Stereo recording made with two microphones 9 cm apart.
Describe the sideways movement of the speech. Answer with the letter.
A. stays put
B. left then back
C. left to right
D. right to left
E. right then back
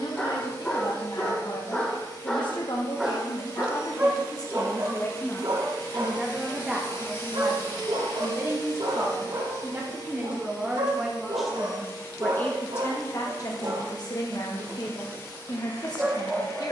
E.